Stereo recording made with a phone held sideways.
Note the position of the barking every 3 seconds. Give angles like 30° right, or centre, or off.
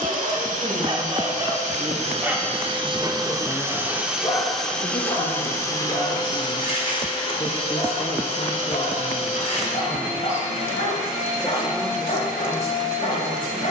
20° right, 20° left, 50° left, 60° left, 60° left.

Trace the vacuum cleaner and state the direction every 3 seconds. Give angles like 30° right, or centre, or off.
50° right, centre, 40° left, 60° left, 60° left.